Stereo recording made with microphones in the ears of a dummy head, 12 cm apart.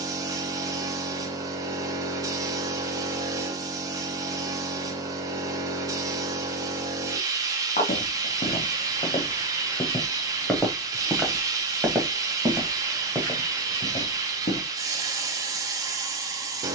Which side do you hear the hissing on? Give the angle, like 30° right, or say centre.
20° right.